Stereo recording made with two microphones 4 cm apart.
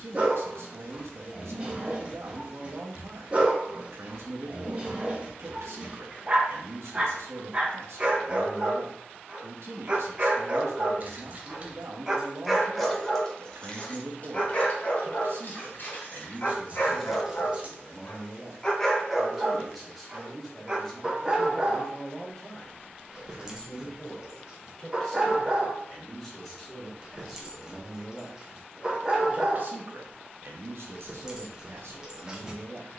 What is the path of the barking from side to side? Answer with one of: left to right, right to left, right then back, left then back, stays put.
left then back.